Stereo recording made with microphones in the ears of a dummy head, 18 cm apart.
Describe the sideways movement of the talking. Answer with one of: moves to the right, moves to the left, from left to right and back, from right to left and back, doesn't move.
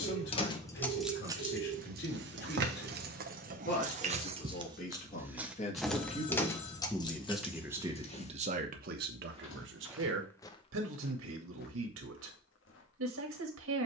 moves to the right.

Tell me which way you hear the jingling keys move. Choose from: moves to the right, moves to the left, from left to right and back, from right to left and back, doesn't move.
from left to right and back.